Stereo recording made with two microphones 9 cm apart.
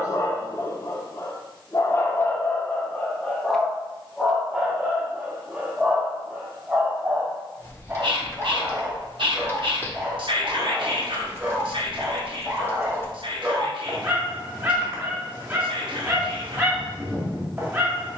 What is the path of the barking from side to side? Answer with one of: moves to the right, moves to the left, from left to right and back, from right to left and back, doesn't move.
moves to the right.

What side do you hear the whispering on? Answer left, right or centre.
right.